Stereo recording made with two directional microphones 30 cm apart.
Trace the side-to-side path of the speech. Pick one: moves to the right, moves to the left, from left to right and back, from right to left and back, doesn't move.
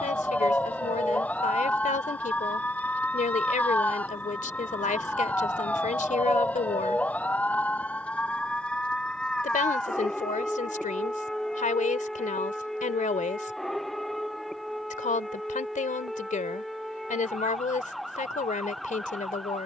doesn't move.